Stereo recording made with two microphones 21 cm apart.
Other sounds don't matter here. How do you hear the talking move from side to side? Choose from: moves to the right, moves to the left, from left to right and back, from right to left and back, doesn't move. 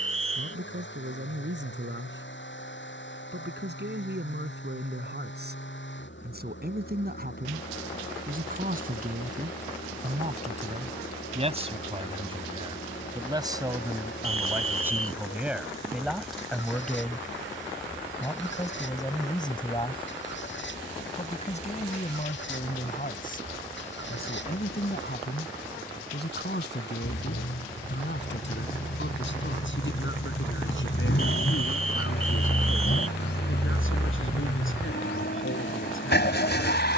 moves to the left.